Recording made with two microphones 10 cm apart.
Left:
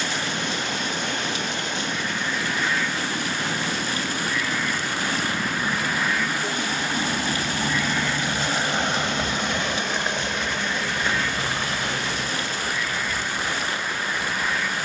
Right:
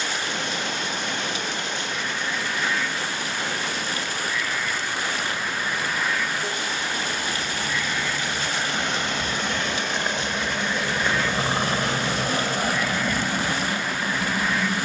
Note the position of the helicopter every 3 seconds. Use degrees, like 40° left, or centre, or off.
60° left, 60° left, 40° left, 10° right, 60° right.